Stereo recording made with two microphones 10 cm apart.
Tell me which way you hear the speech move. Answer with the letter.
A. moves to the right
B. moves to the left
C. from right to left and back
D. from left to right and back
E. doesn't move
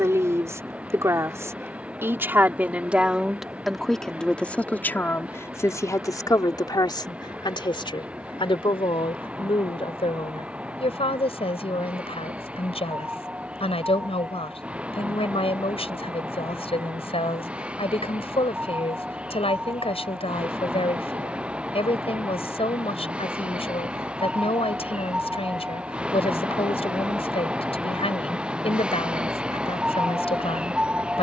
B.